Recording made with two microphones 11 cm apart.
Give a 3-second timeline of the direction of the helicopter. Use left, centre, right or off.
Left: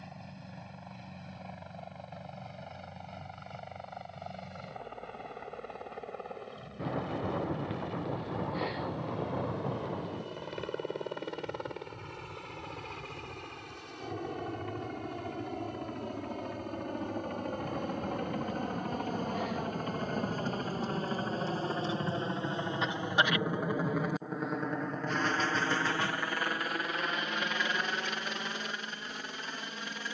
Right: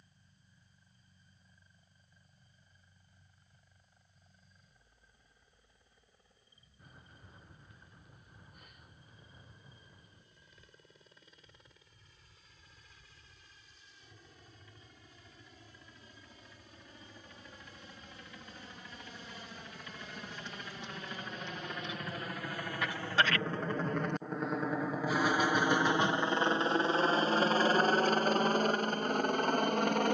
left, left, left, left, left, left, left, left, centre, right.